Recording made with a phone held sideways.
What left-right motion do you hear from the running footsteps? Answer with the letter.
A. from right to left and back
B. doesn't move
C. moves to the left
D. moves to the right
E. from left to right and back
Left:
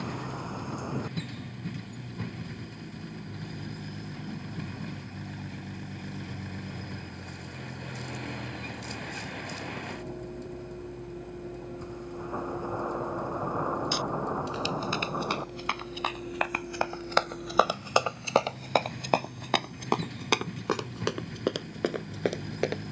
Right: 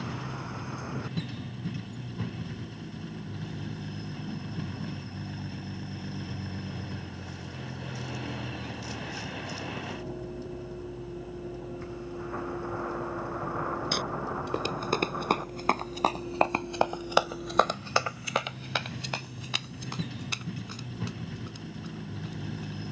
C.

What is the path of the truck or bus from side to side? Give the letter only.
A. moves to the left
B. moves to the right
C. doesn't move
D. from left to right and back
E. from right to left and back
C.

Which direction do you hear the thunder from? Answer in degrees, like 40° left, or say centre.
10° left.